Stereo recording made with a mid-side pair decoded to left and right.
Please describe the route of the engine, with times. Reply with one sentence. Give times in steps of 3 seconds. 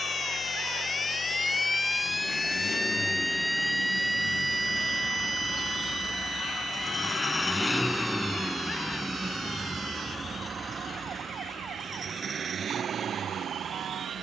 You can hear the engine on the left from 0 s, in the centre from 6 s and on the right from 9 s.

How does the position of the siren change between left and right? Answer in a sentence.
You can hear the siren go from the left side to the right.